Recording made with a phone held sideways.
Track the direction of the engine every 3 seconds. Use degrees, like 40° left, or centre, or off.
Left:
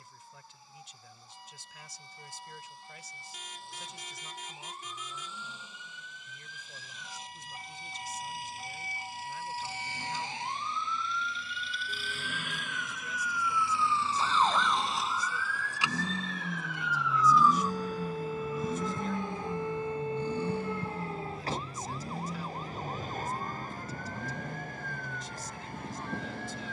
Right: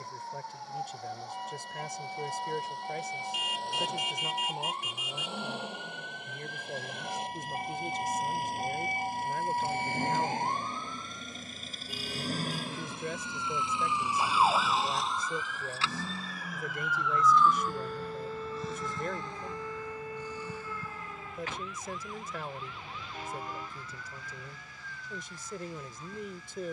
70° right, 70° right, 60° right, 50° right, 20° right, 20° left, 50° left, 70° left, 70° left.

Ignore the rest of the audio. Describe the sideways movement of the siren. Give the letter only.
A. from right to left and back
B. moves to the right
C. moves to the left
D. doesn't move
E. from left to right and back
C.